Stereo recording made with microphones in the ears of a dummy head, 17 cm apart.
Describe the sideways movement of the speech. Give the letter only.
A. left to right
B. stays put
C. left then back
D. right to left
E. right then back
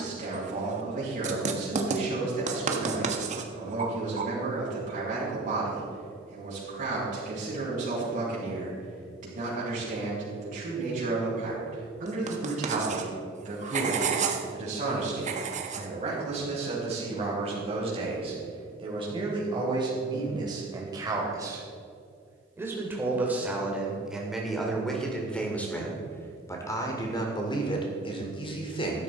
D.